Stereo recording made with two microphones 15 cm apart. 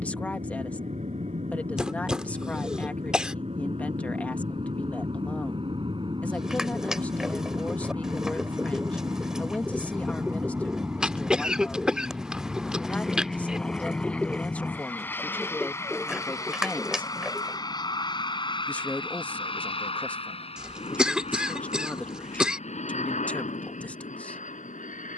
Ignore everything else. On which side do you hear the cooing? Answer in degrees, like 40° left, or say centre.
centre.